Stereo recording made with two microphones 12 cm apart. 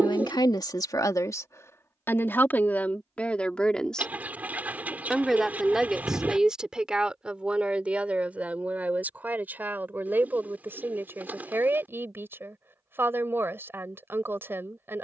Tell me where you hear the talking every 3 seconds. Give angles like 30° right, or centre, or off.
30° left, centre, 10° right, 20° right, 20° right.